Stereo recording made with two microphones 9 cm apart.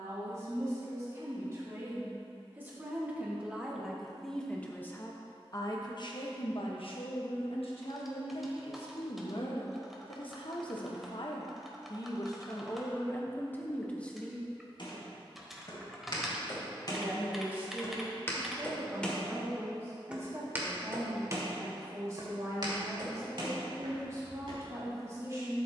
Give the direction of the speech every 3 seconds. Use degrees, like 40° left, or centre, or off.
30° right, 10° left, 70° left, 60° left, 20° left, 20° right, 30° right, 30° right, 30° right.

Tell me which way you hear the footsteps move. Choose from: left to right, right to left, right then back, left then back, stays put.
left to right.